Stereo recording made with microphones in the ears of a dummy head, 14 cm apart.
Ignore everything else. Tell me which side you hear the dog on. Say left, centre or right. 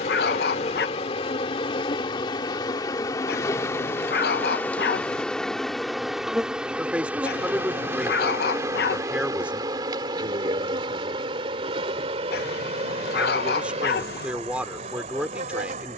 left.